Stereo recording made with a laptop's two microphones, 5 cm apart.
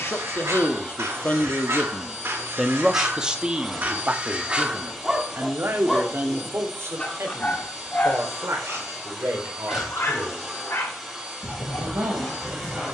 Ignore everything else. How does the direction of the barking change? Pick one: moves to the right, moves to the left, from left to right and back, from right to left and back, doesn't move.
moves to the left.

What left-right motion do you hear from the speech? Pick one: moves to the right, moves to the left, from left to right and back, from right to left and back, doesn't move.
moves to the right.